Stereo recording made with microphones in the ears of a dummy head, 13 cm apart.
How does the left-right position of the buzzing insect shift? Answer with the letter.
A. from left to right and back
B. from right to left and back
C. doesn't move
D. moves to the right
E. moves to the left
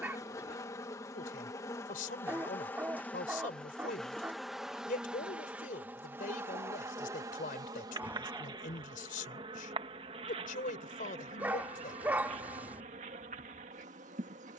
D.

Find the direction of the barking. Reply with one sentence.
In this clip you hear the barking in the centre.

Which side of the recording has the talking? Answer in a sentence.
In this clip you hear the talking on the left.